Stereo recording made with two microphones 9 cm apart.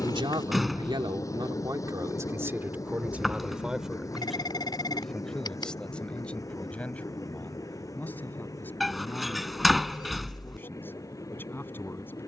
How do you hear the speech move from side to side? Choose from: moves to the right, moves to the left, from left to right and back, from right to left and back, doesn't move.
moves to the left.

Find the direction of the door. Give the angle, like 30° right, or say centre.
centre.